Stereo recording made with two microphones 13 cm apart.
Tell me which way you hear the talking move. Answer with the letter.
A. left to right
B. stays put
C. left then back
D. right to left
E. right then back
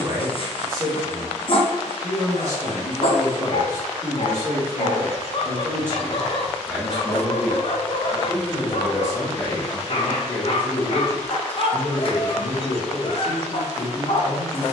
D.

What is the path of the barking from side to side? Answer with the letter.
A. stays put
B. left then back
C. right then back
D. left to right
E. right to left
A.